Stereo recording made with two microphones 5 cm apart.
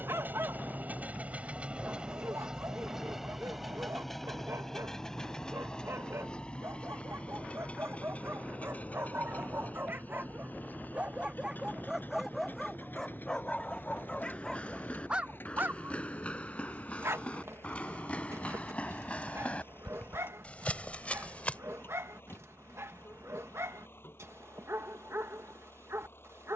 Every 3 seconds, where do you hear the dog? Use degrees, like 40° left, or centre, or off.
70° right, 70° right, 60° right, 30° right, 10° left, 50° right, 70° right, 70° right, 70° right.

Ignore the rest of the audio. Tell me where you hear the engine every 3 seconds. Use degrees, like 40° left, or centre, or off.
20° right, 10° left, 30° left, 40° left, 50° left, 50° left, 50° left, 50° left, 60° left.